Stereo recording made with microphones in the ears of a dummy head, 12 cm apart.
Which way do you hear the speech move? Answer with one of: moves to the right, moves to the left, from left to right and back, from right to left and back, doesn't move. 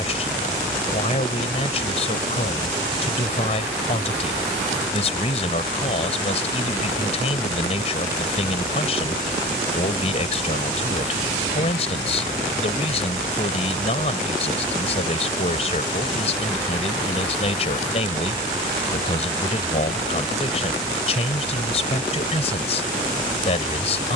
doesn't move.